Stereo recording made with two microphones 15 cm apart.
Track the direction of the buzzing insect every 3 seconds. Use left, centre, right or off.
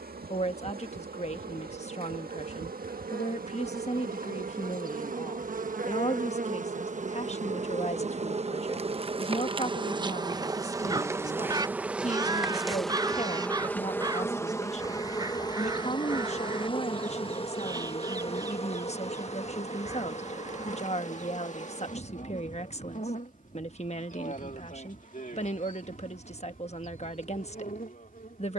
right, right, right, right, centre, left, left, left, left, left.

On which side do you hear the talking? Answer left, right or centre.
left.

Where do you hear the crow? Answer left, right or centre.
right.